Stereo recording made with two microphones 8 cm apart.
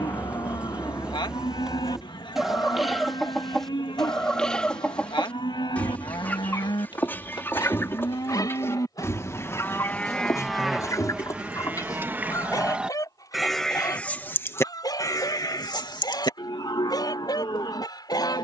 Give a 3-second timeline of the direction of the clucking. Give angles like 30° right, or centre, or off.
10° right, 10° left, 30° left, 40° left, 50° left, 50° left.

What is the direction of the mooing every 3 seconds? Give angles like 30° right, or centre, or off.
70° left, 70° left, 60° left, centre, centre, 60° left.